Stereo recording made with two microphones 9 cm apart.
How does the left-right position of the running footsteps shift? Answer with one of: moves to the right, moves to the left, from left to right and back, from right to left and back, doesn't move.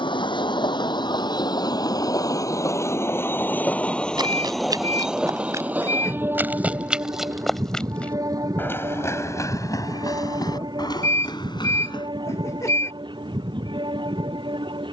moves to the left.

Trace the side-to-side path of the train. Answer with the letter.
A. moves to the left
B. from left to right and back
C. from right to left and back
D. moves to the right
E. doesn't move
D.